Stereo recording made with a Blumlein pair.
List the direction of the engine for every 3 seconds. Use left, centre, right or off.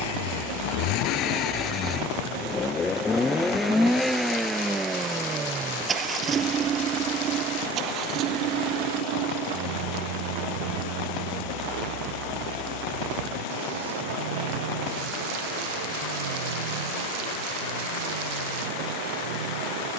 left, centre, right, right, right, right, right.